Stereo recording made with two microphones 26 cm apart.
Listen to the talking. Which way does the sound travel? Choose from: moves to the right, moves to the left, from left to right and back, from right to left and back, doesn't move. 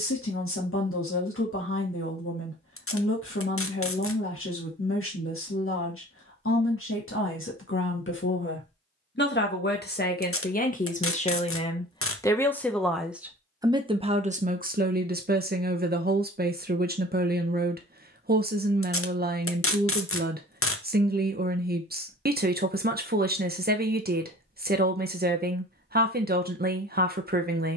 moves to the right.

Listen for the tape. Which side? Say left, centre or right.
left.